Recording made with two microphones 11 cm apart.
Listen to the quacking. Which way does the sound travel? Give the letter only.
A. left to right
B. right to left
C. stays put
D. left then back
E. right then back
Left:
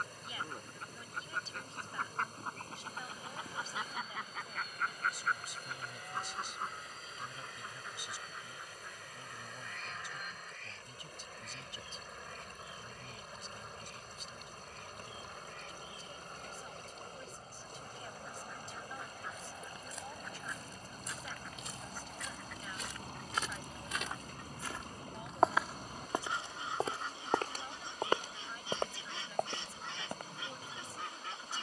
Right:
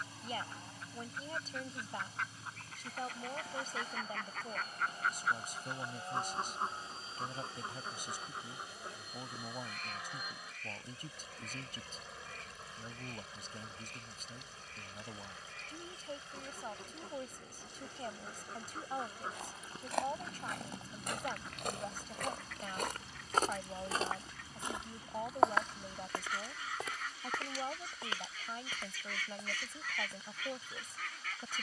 E.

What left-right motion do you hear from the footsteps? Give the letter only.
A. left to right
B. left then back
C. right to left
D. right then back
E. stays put
C.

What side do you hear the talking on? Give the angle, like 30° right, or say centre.
50° right.